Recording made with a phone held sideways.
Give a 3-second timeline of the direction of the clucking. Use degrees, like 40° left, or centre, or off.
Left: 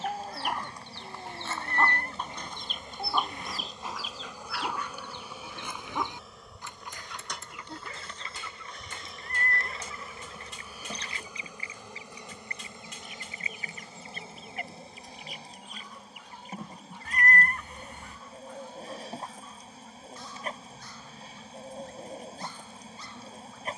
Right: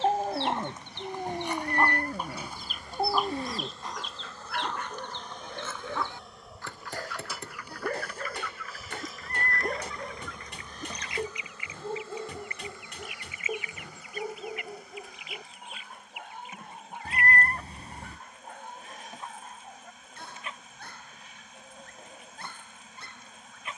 20° right, 10° left, 20° left, 30° left, 40° left, 40° left, 40° left, 40° left.